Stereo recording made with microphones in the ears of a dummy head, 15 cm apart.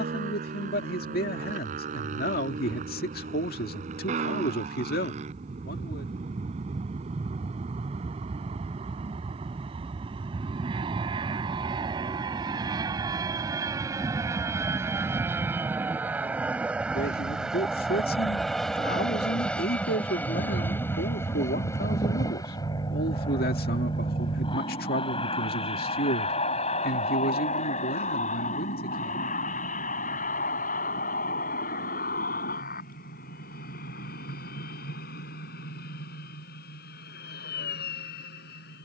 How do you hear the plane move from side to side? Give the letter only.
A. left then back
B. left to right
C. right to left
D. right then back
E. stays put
C.